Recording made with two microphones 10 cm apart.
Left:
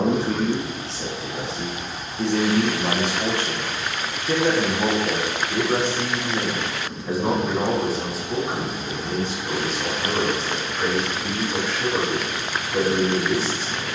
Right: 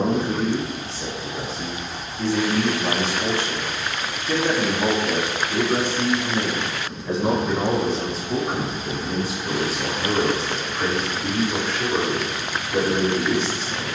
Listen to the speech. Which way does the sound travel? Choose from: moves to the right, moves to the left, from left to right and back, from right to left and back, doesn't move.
moves to the right.